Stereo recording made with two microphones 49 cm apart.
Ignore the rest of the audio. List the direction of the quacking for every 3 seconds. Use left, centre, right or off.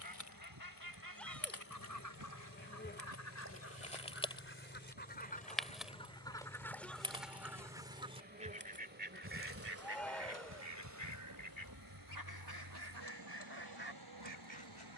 left, left, centre, right, right.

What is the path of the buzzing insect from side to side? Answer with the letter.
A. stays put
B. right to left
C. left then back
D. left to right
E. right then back
D.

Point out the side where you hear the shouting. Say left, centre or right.
centre.